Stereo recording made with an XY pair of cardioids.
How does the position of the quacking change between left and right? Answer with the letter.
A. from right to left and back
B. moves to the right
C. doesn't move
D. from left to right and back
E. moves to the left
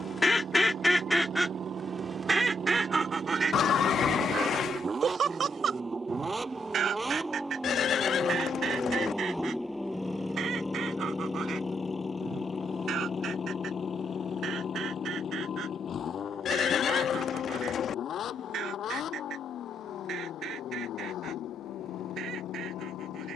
B.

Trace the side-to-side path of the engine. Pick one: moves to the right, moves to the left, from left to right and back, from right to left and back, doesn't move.
moves to the left.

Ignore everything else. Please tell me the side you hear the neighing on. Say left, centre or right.
left.